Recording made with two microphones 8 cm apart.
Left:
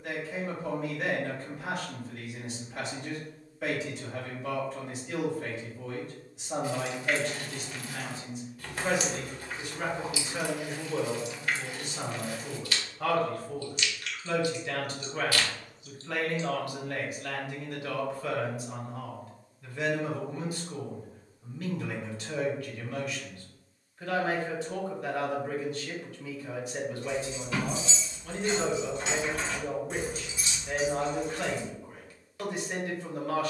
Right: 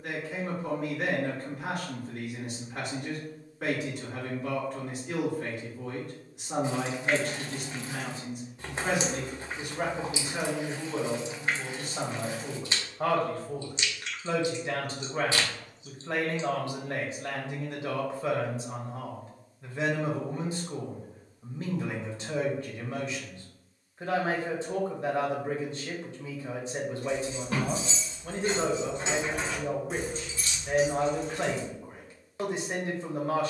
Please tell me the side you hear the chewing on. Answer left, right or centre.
right.